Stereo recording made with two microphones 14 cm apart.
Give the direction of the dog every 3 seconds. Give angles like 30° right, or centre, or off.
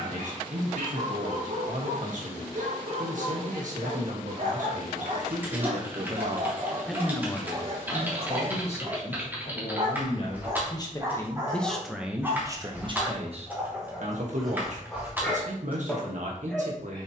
70° right, 70° right, 50° right, 30° right, 10° right, 10° left.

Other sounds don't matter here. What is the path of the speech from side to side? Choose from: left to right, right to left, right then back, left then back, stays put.
left then back.